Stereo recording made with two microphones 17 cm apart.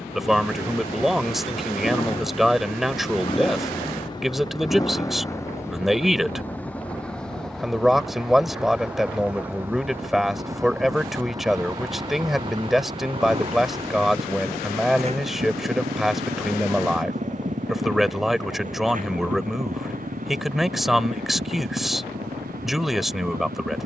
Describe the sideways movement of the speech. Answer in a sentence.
In this clip you hear the speech stay in one place.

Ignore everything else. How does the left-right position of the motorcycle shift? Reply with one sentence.
In this clip you hear the motorcycle move from left to right.